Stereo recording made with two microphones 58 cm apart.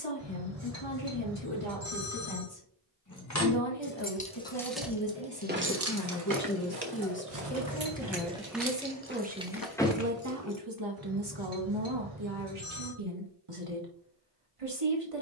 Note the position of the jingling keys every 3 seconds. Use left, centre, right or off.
off, centre, right, centre, off.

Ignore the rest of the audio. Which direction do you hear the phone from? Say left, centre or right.
right.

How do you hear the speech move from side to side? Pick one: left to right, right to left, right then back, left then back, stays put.
left to right.